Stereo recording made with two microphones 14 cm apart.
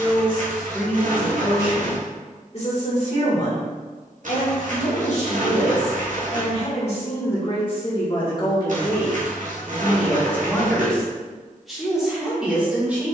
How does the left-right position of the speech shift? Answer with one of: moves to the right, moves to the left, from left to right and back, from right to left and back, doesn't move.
from right to left and back.